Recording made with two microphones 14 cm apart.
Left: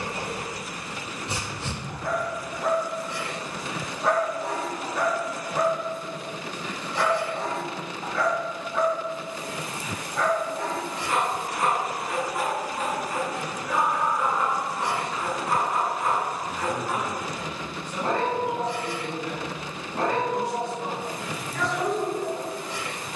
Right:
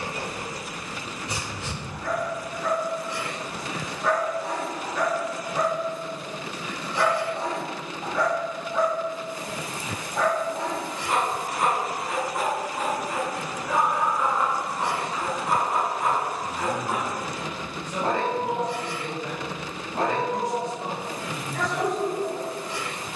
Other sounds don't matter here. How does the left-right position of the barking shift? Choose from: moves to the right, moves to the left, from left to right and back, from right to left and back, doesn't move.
moves to the right.